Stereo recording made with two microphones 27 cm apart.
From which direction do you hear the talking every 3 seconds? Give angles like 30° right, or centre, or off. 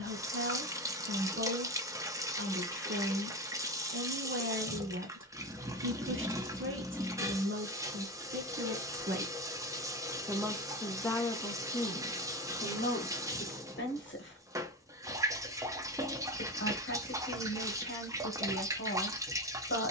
50° right, 50° right, 50° right, centre, 40° left, 50° left, 50° left.